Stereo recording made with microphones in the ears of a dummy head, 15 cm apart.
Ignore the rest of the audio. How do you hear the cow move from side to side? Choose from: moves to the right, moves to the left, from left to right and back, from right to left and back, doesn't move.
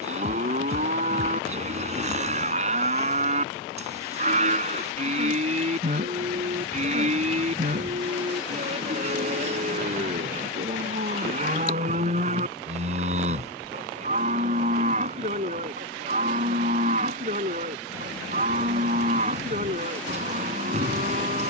doesn't move.